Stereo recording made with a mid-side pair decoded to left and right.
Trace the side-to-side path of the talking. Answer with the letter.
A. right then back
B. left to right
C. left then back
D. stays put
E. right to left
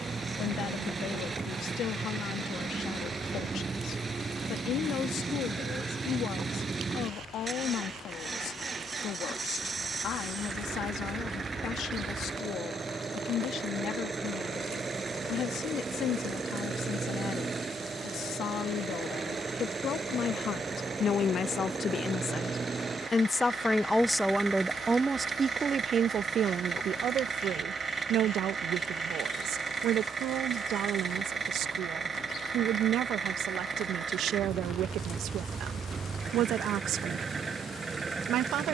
B.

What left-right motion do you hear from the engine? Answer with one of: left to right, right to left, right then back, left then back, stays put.
stays put.